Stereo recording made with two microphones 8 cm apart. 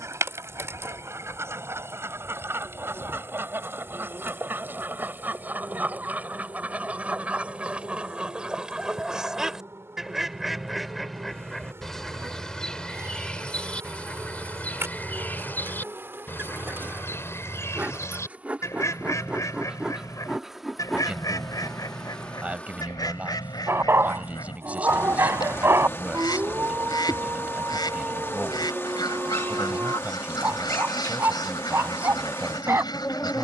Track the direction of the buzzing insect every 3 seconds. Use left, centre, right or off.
right, right, right, right, right, right, centre, centre, left, left, left.